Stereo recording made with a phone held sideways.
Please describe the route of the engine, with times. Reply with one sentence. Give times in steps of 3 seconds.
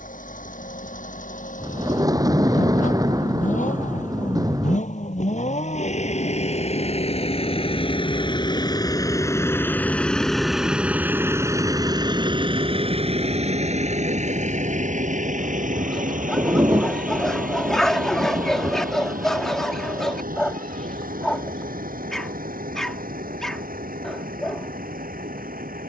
In this clip you hear the engine on the left from 0 s, in the centre from 9 s and on the right from 12 s.